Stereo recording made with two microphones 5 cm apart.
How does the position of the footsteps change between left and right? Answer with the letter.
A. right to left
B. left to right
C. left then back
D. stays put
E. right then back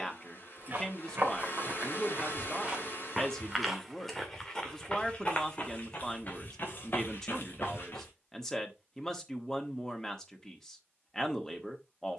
A.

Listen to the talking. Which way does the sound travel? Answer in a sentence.
In this clip you hear the talking stay in one place.